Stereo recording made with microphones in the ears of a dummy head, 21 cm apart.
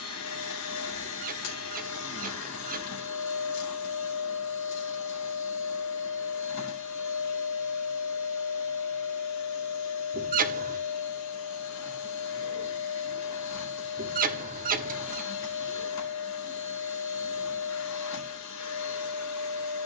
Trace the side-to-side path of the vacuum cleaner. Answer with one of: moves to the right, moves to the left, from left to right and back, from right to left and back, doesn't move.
doesn't move.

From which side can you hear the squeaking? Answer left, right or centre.
right.